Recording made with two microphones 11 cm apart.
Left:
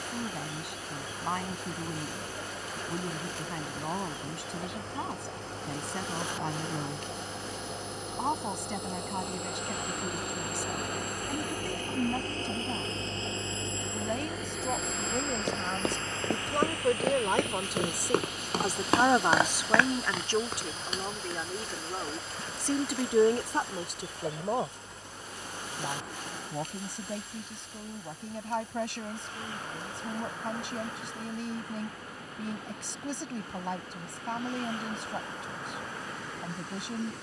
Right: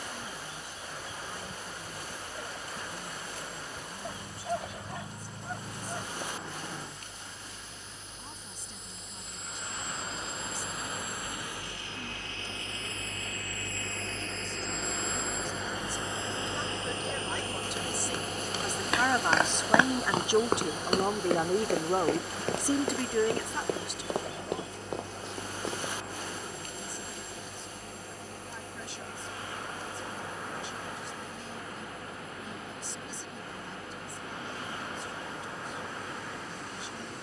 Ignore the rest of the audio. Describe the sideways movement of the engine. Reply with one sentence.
You can hear the engine move from left to right.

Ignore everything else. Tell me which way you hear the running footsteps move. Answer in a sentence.
In this clip you hear the running footsteps travel towards the right.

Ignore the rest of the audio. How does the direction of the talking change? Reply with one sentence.
You can hear the talking move from left to right and back again.